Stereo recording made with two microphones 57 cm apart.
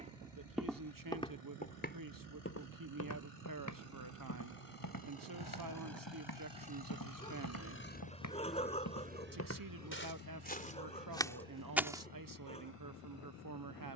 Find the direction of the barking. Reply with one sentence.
In this clip you hear the barking in the centre.